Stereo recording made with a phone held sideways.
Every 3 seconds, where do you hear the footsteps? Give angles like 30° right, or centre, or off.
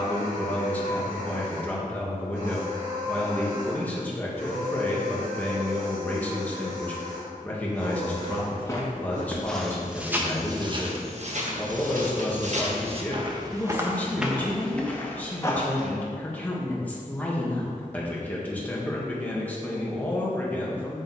off, off, 20° left, 30° right, 30° right, 20° left, off.